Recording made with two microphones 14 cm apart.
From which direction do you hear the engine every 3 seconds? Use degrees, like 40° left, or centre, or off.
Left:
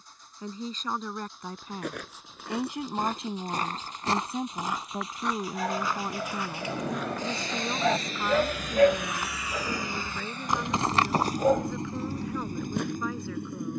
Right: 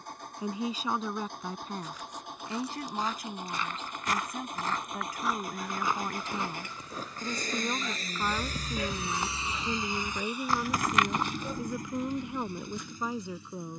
60° right, 60° right, 40° right, centre, 50° left.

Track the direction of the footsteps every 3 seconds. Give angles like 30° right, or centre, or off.
70° left, 20° left, 30° right, 20° left, 60° left.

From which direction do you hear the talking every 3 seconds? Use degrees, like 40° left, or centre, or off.
centre, 30° left, centre, 10° right, 20° right.